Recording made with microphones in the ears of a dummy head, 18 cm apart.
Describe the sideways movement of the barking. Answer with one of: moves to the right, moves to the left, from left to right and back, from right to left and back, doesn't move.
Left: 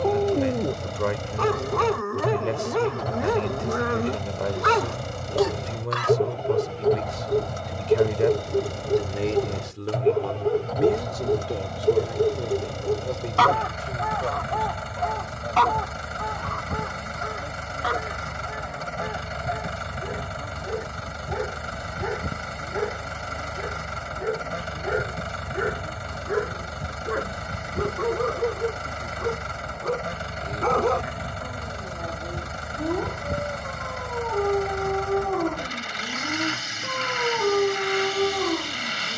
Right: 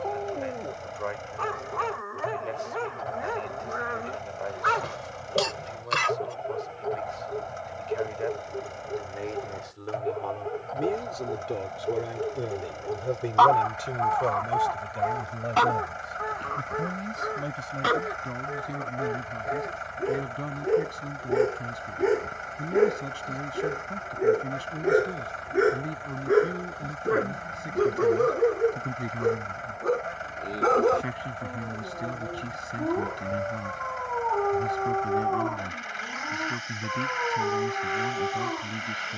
from left to right and back.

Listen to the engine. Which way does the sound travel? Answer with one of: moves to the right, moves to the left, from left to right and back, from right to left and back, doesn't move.
doesn't move.